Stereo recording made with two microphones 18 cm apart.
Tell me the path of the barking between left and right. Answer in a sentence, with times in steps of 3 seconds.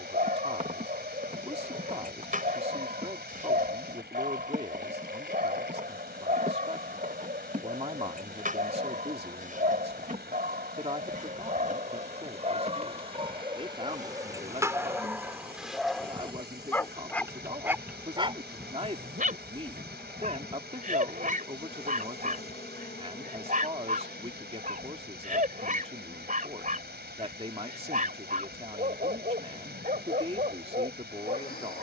You can hear the barking on the right from 0 s, in the centre from 15 s and on the right from 18 s.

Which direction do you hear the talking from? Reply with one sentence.
In this clip you hear the talking on the right.